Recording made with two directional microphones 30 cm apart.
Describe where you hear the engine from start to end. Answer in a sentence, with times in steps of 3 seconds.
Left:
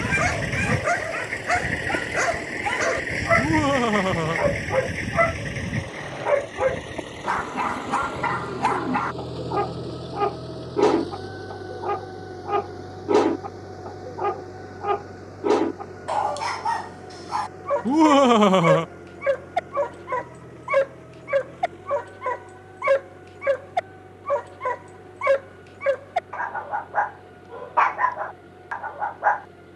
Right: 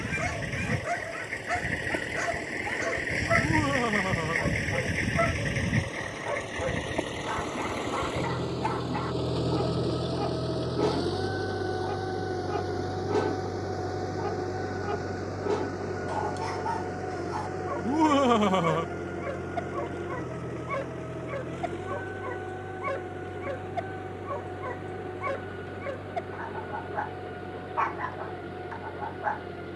You can hear the engine on the left from 0 s, in the centre from 3 s and on the right from 6 s.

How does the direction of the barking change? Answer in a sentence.
You can hear the barking stay put.